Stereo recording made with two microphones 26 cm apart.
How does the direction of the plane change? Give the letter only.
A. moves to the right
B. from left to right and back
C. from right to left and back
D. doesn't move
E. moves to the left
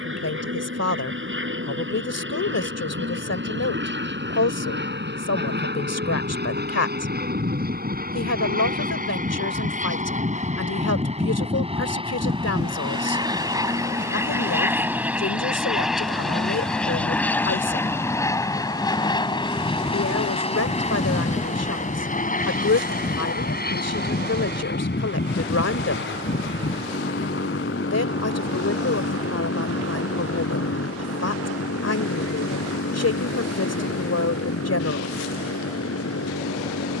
E.